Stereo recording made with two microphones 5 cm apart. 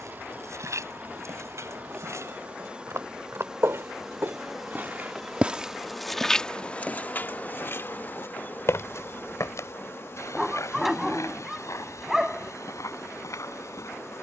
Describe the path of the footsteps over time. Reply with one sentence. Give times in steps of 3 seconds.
In this clip you hear the footsteps on the right from 0 s and on the left from 6 s.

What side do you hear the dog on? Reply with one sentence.
You can hear the dog in the centre.